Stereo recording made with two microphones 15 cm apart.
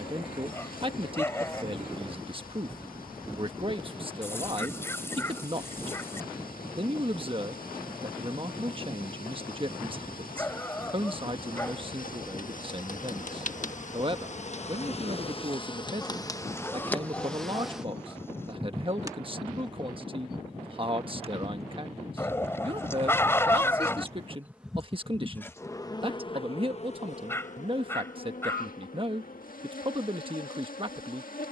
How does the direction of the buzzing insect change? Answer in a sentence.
You can hear the buzzing insect go right and come back.